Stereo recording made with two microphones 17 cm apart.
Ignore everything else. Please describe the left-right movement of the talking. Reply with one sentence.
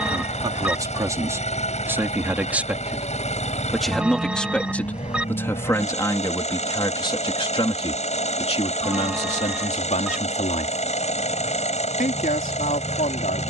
In this clip you hear the talking go from the right side to the left.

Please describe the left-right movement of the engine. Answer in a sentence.
You can hear the engine stay put.